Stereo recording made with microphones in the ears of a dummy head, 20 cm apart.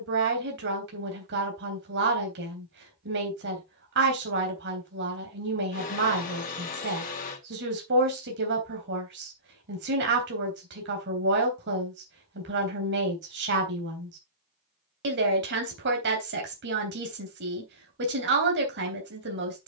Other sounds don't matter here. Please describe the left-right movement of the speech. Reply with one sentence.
You can hear the speech stay put.